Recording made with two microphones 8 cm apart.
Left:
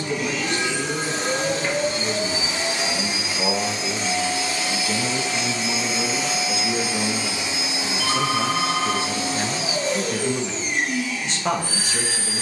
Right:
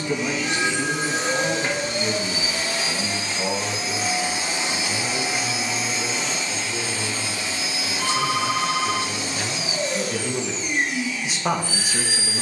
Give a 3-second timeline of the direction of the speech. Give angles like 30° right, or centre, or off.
10° right, 40° left, 50° left, 10° left.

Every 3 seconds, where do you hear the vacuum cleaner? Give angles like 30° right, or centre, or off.
40° left, 10° right, 20° left, 40° left.